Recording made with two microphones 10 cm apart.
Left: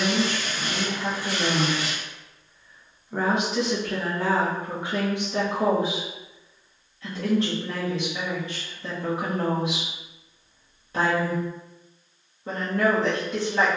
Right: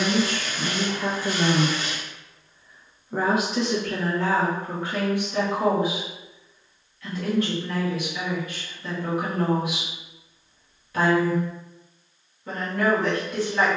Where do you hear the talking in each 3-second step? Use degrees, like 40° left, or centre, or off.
40° right, 10° left, 30° left, 30° left, 30° left.